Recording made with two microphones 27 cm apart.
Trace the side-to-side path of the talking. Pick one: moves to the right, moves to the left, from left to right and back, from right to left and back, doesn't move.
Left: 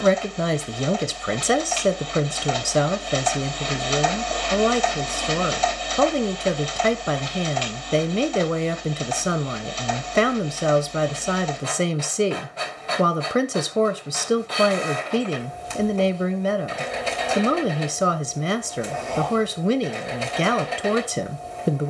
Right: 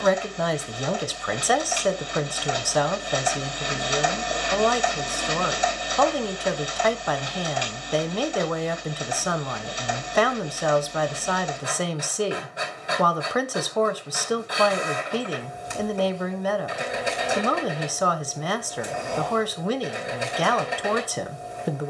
doesn't move.